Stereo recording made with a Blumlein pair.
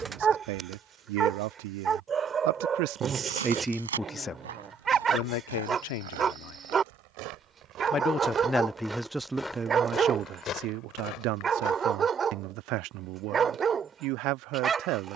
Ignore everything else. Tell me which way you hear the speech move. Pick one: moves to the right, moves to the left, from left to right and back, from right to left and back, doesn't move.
from right to left and back.